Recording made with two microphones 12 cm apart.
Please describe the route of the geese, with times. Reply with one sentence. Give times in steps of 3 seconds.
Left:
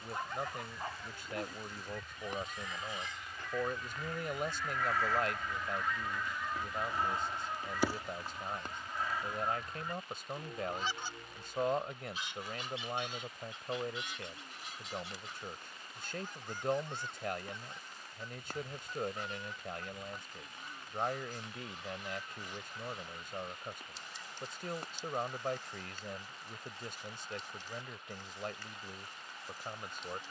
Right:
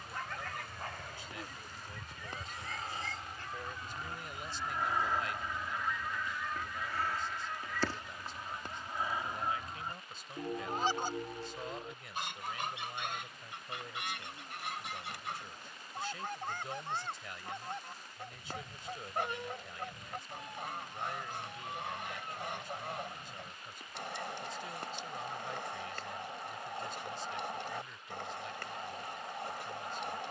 You can hear the geese on the right from 0 s, in the centre from 6 s and on the right from 9 s.